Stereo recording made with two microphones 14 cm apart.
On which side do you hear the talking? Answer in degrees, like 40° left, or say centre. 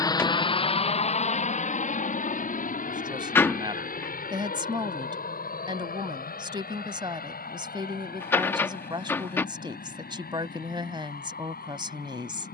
30° right.